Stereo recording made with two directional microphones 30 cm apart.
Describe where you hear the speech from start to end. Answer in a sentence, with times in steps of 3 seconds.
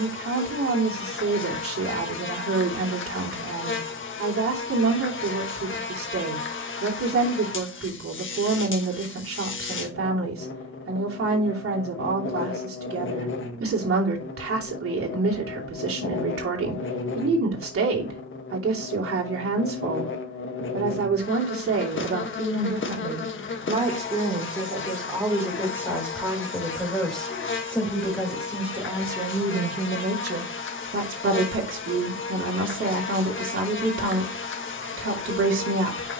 In this clip you hear the speech on the right from 0 s, in the centre from 24 s and on the right from 30 s.